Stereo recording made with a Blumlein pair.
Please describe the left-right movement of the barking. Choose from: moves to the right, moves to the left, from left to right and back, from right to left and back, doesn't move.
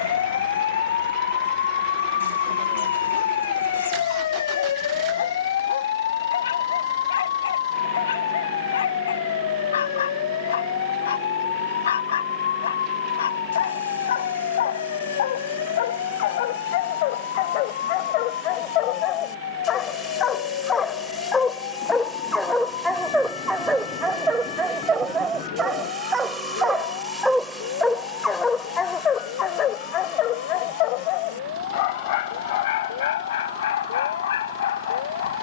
from left to right and back.